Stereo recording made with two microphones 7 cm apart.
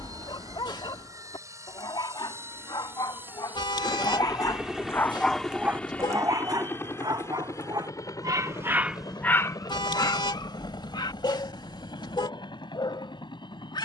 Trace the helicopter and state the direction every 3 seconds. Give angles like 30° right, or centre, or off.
40° right, 10° right, 40° left, 70° left, 70° left.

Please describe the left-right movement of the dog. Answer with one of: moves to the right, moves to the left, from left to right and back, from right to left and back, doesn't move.
from left to right and back.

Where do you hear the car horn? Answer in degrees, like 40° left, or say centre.
80° left.